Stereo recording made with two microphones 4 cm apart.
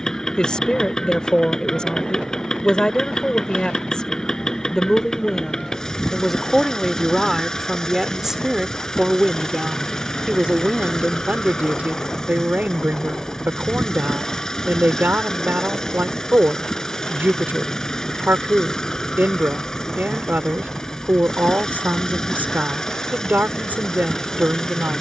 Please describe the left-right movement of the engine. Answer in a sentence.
You can hear the engine stay put.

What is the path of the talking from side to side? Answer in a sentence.
In this clip you hear the talking go from the left side to the right.